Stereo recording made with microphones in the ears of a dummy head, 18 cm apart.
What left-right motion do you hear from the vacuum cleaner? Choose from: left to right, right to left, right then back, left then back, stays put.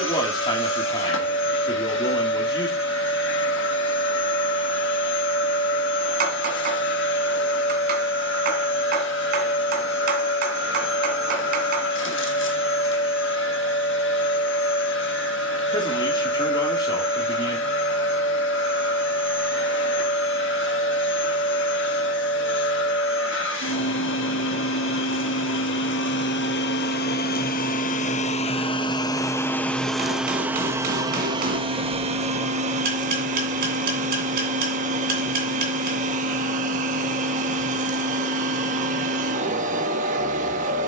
left to right.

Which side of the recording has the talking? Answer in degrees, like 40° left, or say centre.
20° left.